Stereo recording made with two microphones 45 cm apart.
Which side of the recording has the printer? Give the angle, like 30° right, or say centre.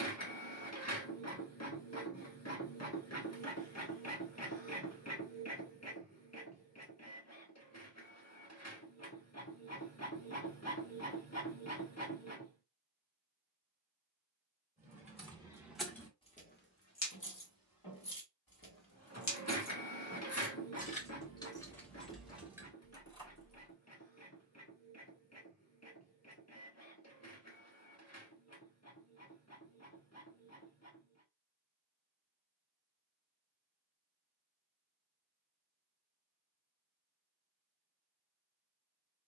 30° left.